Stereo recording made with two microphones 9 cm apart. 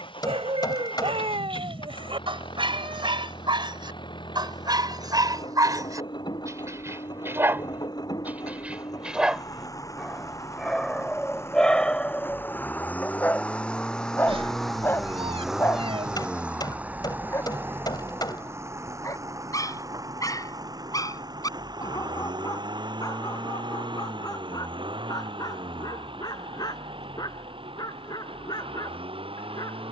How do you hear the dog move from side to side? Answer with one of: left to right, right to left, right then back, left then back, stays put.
right to left.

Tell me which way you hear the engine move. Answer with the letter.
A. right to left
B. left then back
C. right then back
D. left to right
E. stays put
D.